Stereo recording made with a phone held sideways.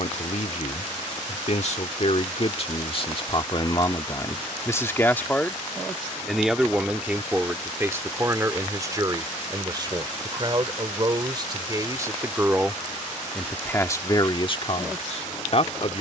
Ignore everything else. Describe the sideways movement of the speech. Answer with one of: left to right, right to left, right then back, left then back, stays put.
right then back.